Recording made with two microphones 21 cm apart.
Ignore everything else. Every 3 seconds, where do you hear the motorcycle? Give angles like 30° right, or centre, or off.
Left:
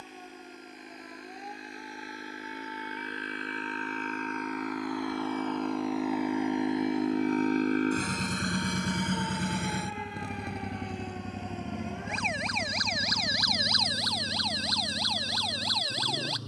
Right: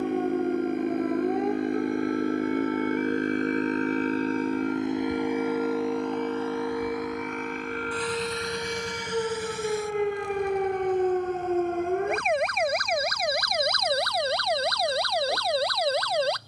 60° right, 30° right, 30° left, 70° left, 80° left, 80° left.